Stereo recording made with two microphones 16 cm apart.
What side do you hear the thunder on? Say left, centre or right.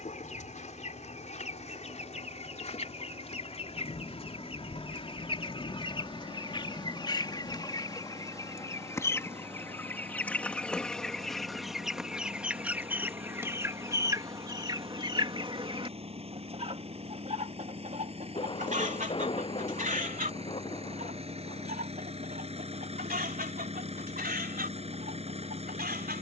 left.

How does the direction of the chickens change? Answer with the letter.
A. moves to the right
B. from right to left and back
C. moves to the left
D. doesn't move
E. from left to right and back
A.